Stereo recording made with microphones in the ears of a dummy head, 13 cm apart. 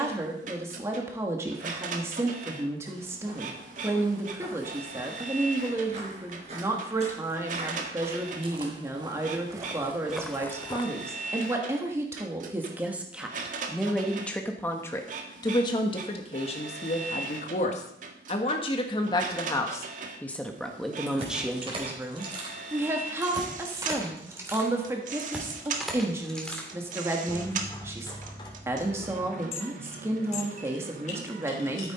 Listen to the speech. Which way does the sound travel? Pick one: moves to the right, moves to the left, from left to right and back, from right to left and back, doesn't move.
from right to left and back.